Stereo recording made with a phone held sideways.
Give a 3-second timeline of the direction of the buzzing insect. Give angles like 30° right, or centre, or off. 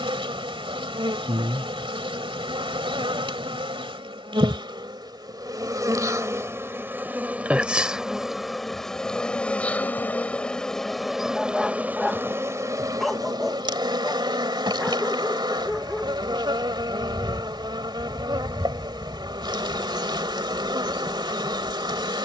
30° right, 30° right, 10° right, centre, 20° right, 30° right, 30° right, 30° right.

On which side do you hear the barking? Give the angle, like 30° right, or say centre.
centre.